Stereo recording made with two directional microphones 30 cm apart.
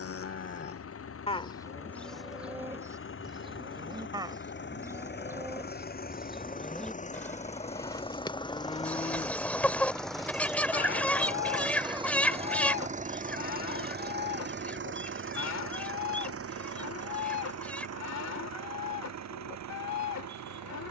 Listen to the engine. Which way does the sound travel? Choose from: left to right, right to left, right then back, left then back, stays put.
left to right.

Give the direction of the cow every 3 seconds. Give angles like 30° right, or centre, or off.
10° left, 10° right, 10° left, 40° left, 60° left, 60° left, 60° left.